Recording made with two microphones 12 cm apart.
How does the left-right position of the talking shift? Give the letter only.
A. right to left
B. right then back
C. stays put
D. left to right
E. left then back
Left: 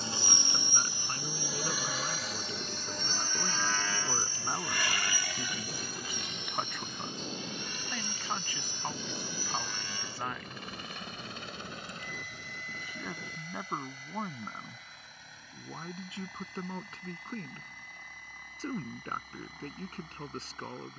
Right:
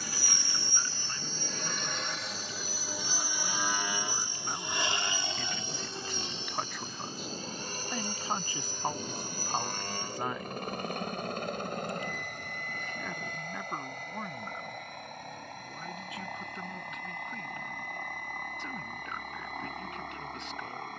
B.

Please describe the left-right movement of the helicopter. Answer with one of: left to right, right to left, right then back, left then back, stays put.
left to right.